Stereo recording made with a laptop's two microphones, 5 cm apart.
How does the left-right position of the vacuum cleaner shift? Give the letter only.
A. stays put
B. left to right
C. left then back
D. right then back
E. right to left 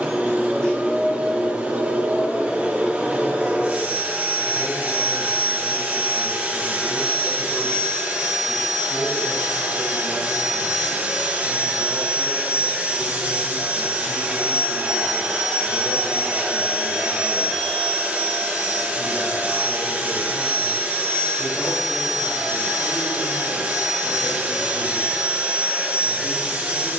A.